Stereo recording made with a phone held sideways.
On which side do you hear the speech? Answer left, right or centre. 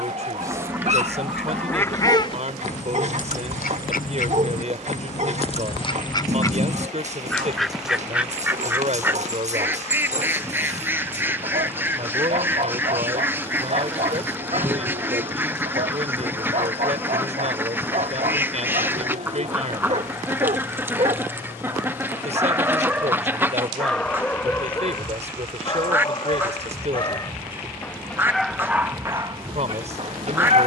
right.